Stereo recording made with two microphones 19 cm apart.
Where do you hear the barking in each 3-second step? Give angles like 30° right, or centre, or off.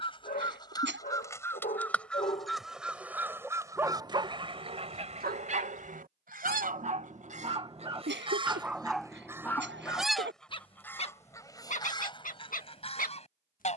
40° left, 30° right, 30° right, 20° left, 50° left.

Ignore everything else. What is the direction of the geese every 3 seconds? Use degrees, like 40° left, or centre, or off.
10° left, 30° right, 40° right, 10° left, 30° left.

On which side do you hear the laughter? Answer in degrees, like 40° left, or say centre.
70° right.